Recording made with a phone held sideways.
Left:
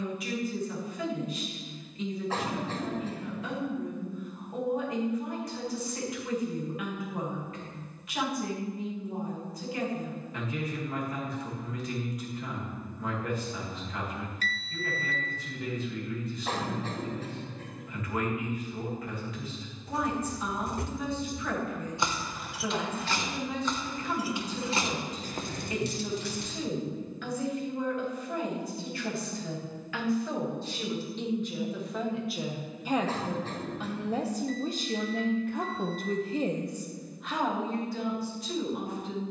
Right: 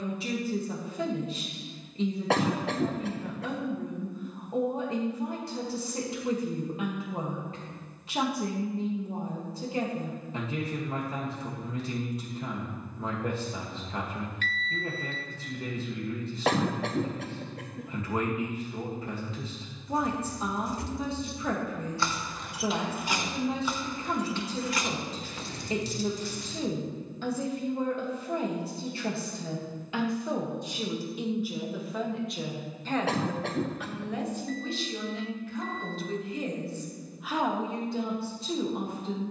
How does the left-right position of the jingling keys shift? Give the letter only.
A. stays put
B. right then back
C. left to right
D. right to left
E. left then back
B.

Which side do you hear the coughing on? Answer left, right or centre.
right.